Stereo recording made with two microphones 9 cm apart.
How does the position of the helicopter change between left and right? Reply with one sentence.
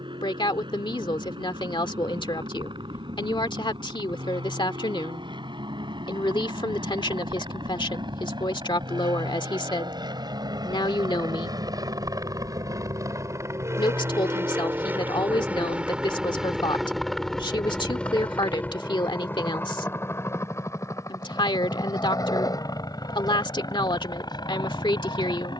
In this clip you hear the helicopter travel towards the left.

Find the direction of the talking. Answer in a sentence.
In this clip you hear the talking on the left.